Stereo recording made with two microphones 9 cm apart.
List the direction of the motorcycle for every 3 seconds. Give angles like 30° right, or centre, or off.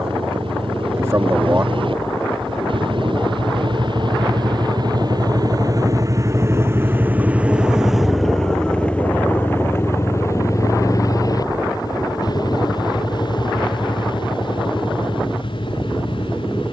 70° right, 60° right, 10° right, 30° left, 50° left, 60° left.